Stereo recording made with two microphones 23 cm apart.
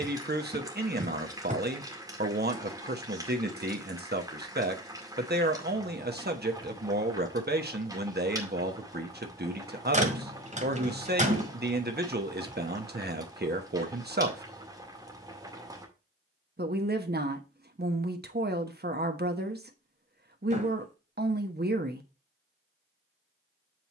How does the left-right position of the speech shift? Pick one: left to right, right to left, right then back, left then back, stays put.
stays put.